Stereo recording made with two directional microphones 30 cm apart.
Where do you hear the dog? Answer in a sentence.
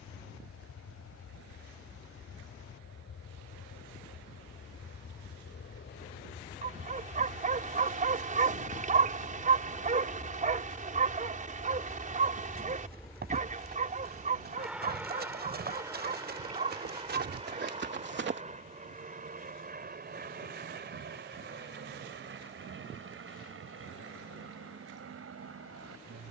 In this clip you hear the dog on the right.